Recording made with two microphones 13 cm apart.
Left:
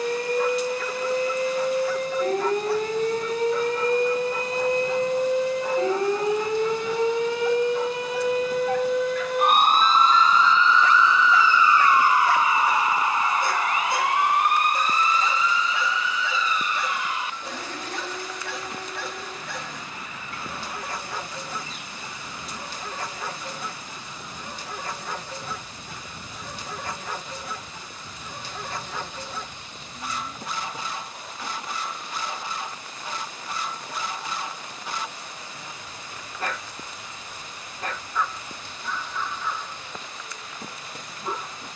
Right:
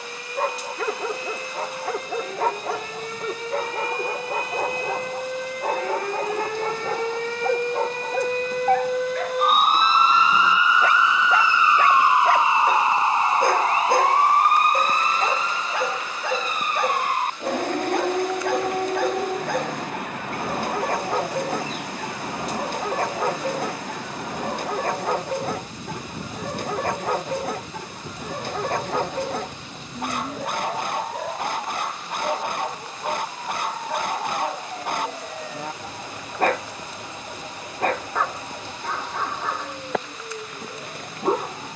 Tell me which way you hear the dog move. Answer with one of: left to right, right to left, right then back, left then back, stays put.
stays put.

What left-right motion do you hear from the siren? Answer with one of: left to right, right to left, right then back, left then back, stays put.
left to right.